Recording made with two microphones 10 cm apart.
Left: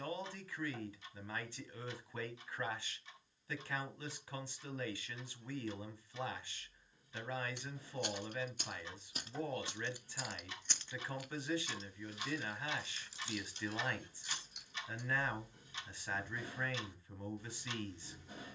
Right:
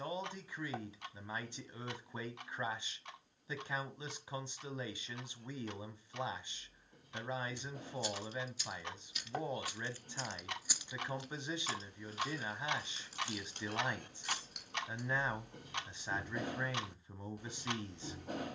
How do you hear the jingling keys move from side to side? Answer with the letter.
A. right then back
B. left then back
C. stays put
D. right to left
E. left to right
E.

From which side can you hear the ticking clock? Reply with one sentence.
You can hear the ticking clock on the right.